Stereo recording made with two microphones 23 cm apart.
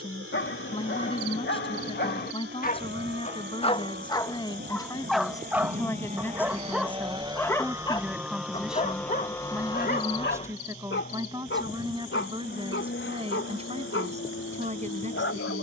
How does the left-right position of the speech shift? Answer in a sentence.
In this clip you hear the speech go from the left side to the right.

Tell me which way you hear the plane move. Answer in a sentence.
In this clip you hear the plane move from right to left.